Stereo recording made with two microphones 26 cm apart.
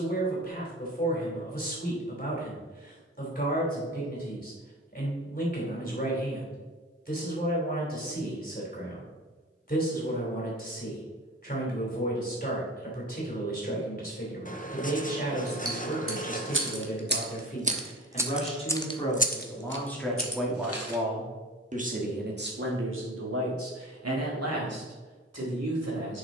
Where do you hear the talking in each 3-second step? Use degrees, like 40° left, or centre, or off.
30° left, 30° left, 30° left, 30° left, 30° left, 30° left, 10° left, 50° right, 80° right.